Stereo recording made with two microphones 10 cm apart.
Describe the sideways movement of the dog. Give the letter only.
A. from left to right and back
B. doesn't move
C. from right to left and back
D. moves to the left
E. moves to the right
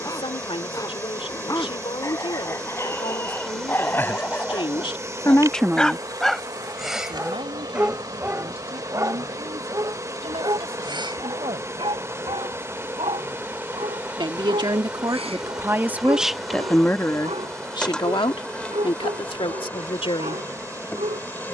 E.